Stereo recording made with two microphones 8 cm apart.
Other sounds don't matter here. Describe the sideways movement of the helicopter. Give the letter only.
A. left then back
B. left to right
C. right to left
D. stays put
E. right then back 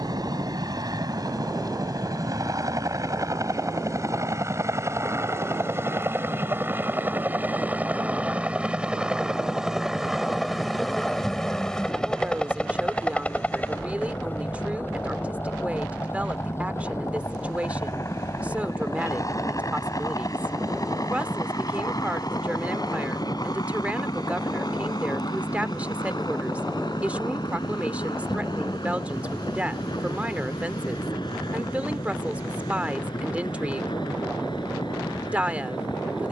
C.